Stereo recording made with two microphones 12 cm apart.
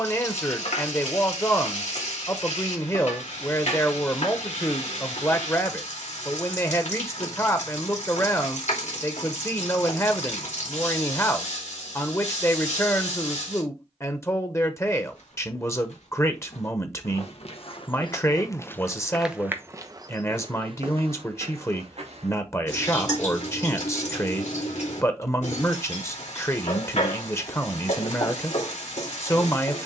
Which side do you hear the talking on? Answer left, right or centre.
left.